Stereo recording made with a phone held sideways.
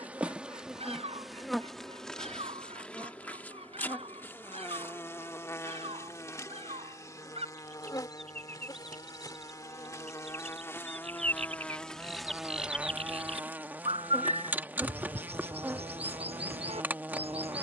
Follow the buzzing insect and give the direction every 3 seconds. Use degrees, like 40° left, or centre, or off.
centre, 20° left, 20° left, 20° left, 10° right, 10° right.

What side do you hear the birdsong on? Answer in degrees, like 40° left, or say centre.
40° right.